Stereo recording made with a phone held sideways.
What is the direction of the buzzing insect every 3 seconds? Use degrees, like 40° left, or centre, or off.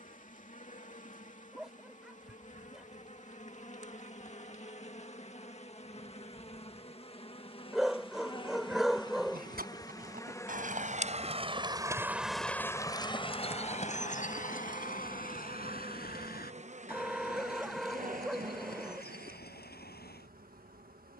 50° left, 50° left, 30° left, 20° left, 10° right, 40° right, 60° right.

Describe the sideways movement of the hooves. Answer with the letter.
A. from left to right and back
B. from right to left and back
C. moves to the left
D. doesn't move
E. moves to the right
C.